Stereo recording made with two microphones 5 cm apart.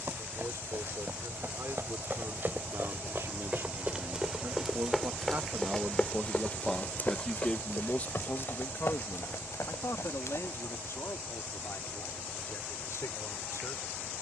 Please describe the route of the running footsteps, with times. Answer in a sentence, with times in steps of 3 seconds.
You can hear the running footsteps on the right from 0 s, in the centre from 3 s, on the left from 6 s and not at all from 12 s.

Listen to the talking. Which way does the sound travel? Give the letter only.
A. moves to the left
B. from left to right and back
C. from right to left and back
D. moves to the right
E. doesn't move
A.